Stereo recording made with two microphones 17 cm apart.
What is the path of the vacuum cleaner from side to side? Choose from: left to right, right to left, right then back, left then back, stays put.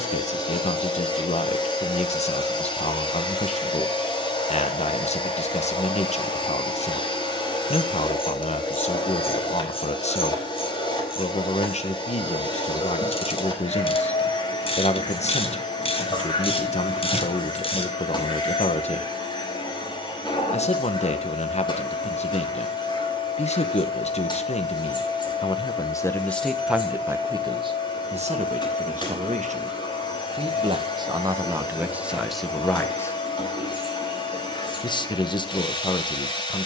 stays put.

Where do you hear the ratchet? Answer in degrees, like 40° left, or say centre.
30° left.